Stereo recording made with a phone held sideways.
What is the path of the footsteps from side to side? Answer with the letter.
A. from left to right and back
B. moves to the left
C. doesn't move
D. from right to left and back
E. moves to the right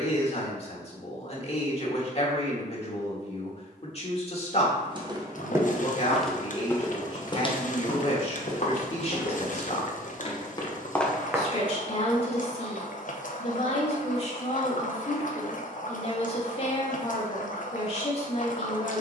D.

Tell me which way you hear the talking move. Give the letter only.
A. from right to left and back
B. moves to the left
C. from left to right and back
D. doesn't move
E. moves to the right
D.